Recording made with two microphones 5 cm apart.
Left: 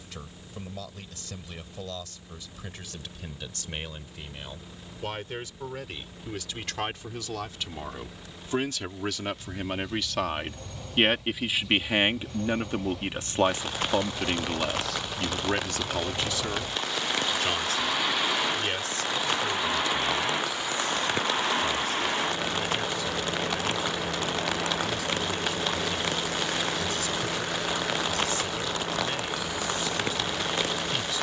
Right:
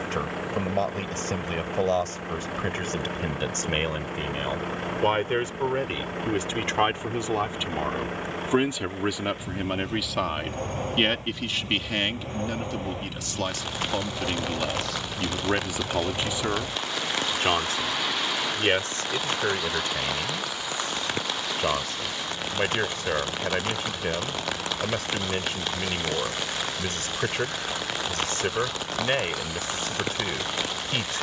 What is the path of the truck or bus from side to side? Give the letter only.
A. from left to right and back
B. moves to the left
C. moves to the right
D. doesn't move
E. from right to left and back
B.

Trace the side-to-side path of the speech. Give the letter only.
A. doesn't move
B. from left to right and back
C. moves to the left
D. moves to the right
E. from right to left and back
E.